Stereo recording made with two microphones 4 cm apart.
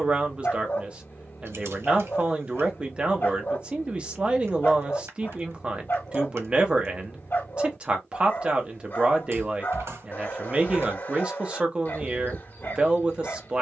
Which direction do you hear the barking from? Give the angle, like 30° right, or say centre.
50° left.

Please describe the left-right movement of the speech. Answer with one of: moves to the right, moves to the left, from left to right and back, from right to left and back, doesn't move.
doesn't move.